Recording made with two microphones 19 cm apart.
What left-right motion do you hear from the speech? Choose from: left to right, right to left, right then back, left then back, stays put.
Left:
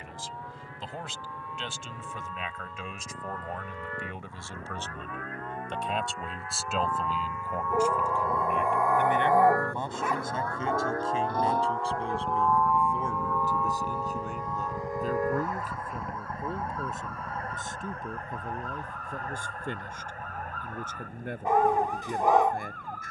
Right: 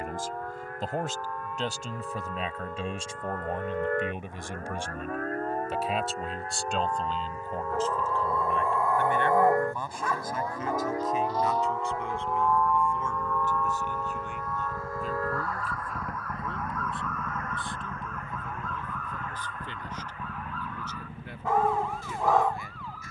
right to left.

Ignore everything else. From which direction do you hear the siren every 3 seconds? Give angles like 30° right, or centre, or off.
60° right, 50° right, 30° right, 10° right, 10° left, 30° left, 40° left, 50° left.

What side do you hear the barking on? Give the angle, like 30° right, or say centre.
20° left.